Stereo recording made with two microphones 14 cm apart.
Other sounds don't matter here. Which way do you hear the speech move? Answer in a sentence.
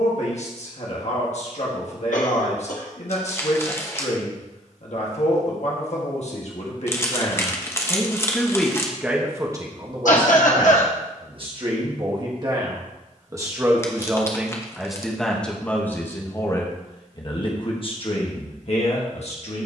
In this clip you hear the speech move from left to right and back again.